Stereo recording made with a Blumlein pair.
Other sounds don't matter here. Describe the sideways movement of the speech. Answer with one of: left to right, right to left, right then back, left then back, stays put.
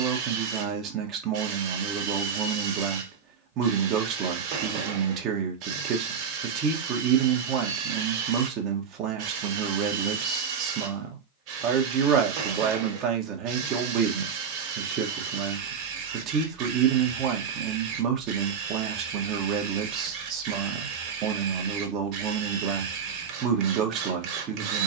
stays put.